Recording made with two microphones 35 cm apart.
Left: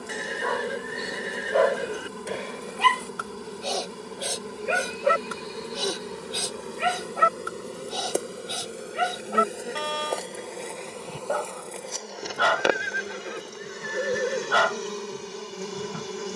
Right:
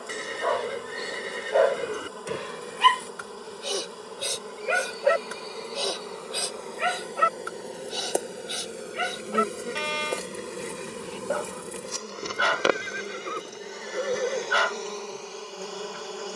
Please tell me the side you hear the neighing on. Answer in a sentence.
You can hear the neighing in the centre.